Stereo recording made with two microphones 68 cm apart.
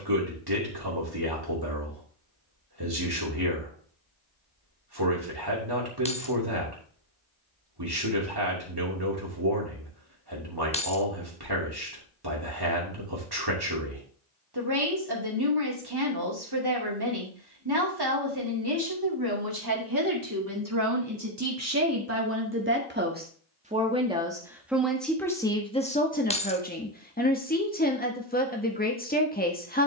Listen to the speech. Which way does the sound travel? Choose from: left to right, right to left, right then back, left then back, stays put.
right to left.